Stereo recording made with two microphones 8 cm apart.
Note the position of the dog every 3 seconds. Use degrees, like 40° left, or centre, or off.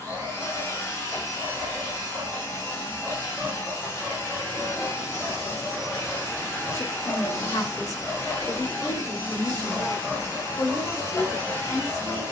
30° right, centre, 10° left, 20° right.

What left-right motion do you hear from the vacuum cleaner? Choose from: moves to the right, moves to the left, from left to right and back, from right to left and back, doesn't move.
doesn't move.